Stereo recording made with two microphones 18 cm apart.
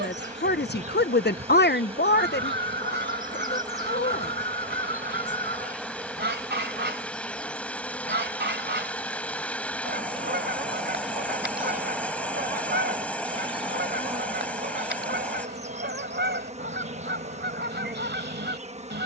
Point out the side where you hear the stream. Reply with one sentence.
In this clip you hear the stream in the centre.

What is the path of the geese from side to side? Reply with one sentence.
You can hear the geese stay put.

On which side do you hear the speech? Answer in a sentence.
You can hear the speech on the left.